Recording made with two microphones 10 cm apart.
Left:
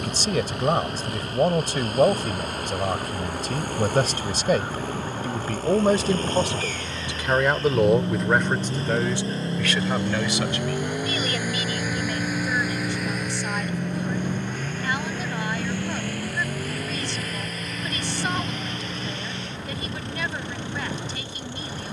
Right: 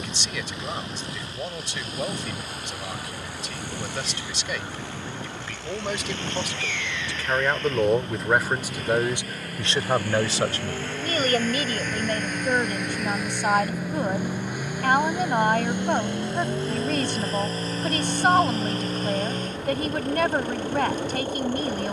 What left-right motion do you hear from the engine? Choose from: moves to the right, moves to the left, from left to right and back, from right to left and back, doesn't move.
moves to the right.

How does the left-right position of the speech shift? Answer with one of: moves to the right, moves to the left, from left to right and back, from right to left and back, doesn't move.
moves to the right.